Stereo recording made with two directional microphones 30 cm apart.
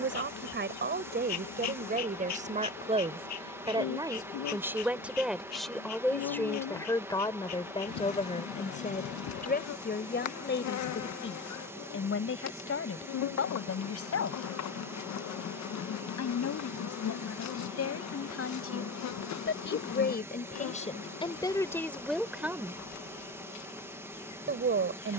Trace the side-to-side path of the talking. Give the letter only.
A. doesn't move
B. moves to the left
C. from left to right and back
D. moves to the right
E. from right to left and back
E.